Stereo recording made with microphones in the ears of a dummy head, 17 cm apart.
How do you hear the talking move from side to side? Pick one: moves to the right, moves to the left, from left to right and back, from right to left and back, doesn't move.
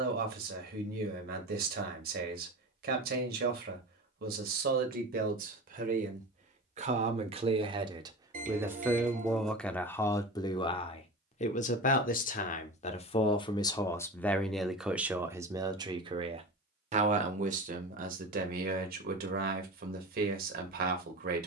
from right to left and back.